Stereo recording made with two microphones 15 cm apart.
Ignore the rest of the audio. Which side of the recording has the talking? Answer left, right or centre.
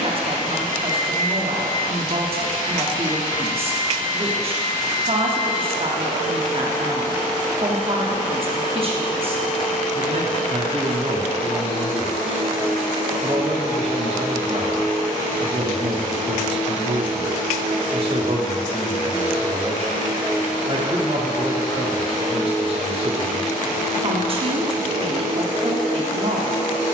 right.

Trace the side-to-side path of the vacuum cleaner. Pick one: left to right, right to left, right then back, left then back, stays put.
stays put.